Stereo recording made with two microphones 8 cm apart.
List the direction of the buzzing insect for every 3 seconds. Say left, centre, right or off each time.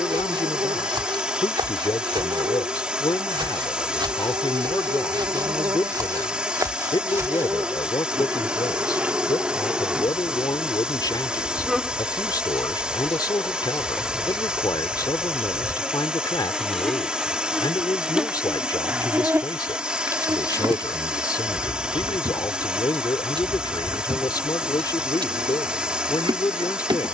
right, right, right, centre, centre, centre, right, right, right.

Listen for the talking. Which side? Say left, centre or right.
left.